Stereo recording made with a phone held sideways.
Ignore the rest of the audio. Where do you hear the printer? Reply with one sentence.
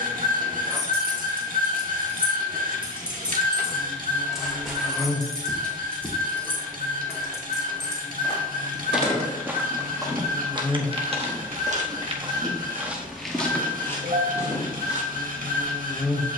You can hear the printer on the right.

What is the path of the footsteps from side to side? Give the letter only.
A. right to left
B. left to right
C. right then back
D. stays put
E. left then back
C.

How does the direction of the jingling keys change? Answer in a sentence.
You can hear the jingling keys move from right to left.